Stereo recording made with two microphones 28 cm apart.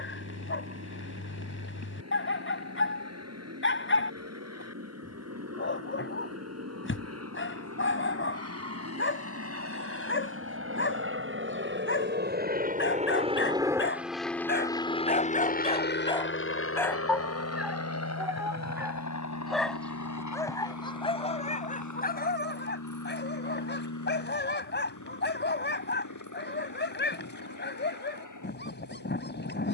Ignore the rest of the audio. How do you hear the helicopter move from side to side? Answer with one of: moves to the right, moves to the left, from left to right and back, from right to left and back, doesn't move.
moves to the left.